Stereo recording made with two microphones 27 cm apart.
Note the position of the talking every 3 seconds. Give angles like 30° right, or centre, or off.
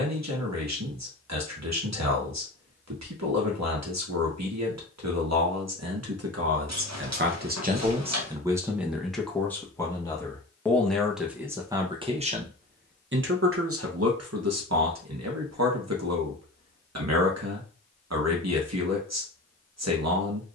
80° right, 80° right, 40° right, centre, 50° right, 70° right, 70° right.